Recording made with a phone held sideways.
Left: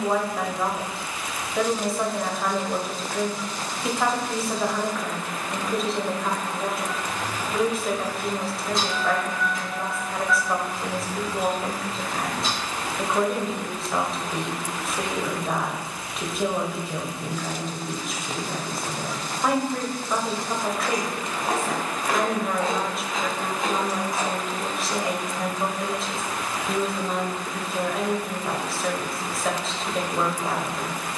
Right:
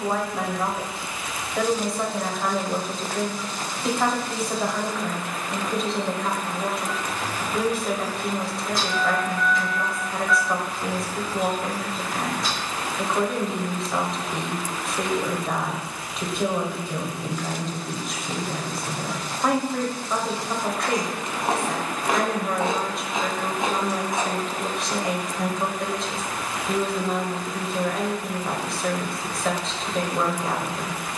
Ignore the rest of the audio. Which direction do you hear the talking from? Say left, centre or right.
centre.